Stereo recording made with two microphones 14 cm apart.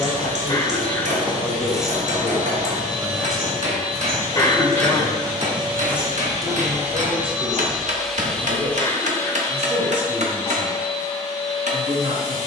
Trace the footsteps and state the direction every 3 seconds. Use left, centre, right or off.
centre, right, centre, off.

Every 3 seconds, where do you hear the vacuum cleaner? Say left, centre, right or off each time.
right, right, centre, left.